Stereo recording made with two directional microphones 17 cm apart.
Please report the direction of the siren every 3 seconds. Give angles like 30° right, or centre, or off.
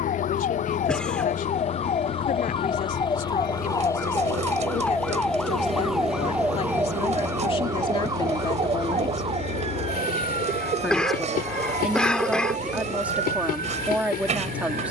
40° left, 10° left, 20° right, 40° right, 50° right.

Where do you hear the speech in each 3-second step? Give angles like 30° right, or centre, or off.
50° left, 50° left, 30° left, centre, 10° right.